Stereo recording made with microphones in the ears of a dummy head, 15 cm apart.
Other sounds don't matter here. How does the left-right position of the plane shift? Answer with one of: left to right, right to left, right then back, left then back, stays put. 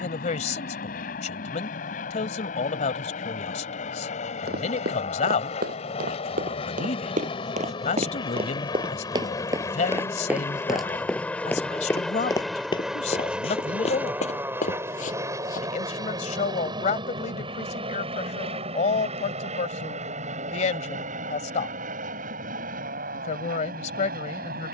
left to right.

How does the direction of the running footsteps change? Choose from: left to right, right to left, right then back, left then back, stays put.
right to left.